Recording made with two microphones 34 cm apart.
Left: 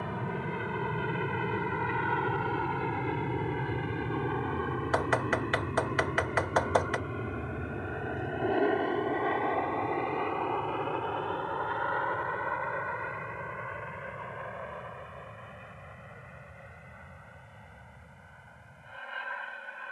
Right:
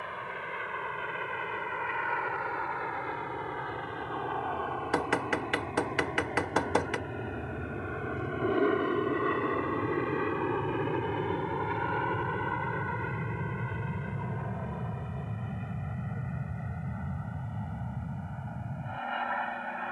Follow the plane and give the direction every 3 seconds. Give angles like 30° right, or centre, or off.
50° left, 30° left, centre, 20° right, 40° right, 50° right, 60° right.